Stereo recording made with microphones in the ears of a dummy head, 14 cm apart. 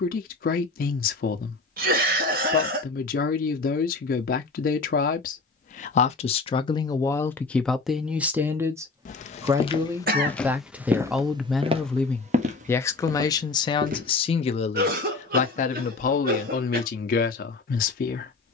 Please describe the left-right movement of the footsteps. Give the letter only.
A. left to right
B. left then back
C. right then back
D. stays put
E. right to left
A.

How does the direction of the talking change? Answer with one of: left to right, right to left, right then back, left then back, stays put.
right then back.